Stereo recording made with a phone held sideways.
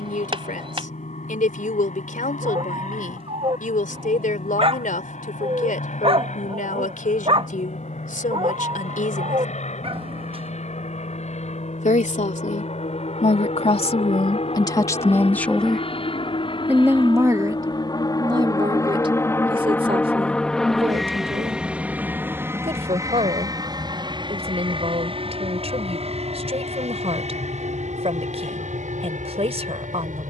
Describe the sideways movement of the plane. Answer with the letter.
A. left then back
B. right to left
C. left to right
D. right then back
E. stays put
C.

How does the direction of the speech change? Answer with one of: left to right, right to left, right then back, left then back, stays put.
left to right.